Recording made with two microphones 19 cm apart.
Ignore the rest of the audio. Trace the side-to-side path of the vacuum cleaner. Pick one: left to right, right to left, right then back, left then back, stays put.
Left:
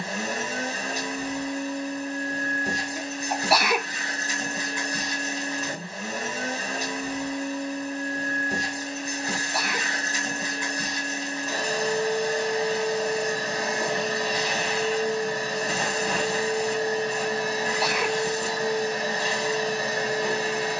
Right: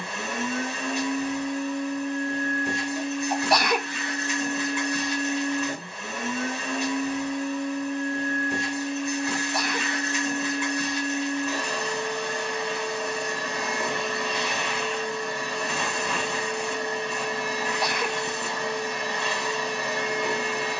stays put.